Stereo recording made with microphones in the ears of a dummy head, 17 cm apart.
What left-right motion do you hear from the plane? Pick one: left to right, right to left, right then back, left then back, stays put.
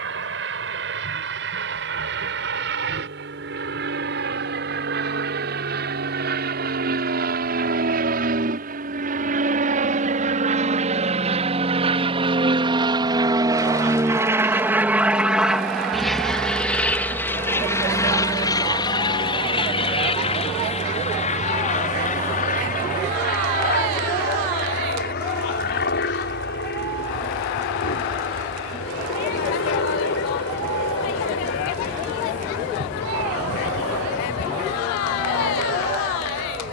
right to left.